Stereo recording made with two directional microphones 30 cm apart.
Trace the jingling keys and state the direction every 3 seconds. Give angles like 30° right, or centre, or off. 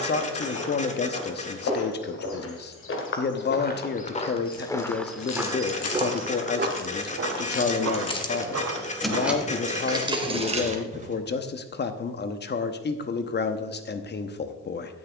off, 60° left, 30° left, 10° right, off.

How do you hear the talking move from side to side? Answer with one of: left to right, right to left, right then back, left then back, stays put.
stays put.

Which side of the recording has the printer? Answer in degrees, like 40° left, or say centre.
20° left.